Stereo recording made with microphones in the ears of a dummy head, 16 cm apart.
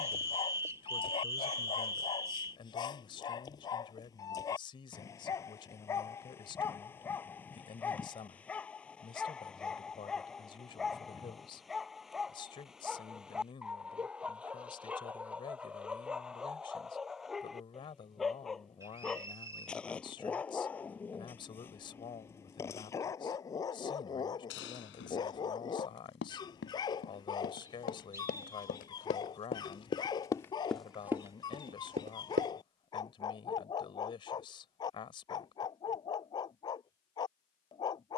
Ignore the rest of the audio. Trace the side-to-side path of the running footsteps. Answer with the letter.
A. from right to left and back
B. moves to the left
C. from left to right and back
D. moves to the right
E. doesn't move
D.